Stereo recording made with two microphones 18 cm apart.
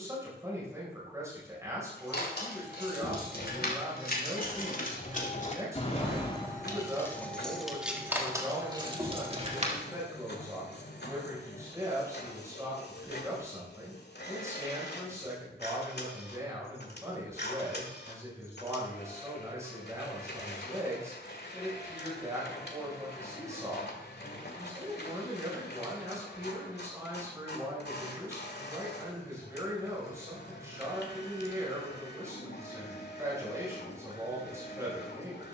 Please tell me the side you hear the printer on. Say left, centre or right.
left.